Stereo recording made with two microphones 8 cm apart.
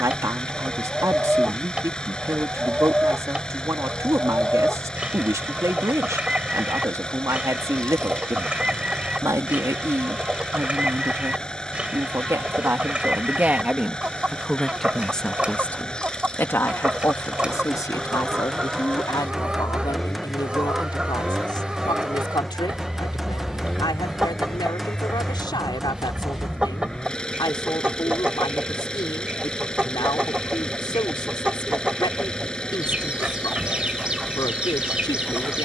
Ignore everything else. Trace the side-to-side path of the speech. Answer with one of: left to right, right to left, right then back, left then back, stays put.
right to left.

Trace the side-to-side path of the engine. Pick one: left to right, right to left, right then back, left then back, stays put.
stays put.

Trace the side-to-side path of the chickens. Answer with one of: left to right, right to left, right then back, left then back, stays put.
stays put.